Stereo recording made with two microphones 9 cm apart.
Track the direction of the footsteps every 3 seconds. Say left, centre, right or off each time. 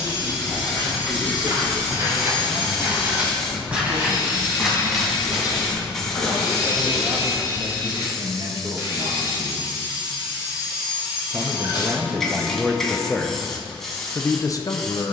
right, centre, centre, off, off.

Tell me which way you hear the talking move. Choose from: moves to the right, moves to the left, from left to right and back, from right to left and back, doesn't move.
moves to the left.